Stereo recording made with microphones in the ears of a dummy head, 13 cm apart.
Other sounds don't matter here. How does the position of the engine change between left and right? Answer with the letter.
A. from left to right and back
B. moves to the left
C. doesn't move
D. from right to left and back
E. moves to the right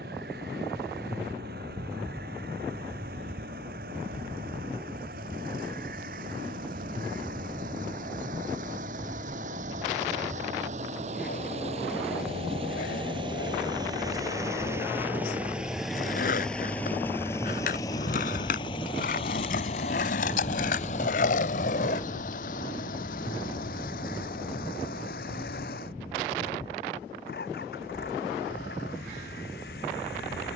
B.